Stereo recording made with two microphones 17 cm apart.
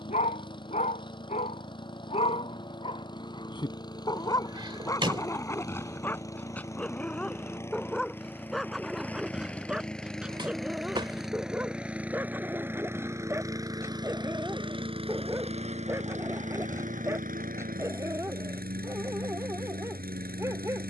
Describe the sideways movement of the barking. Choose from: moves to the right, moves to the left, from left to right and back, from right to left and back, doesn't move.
moves to the right.